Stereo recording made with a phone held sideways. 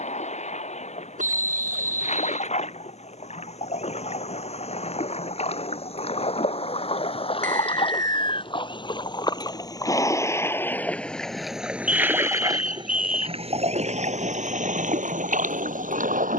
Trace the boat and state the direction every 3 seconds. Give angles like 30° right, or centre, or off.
60° left, 50° left, 40° left, 10° left, 50° right, 80° right.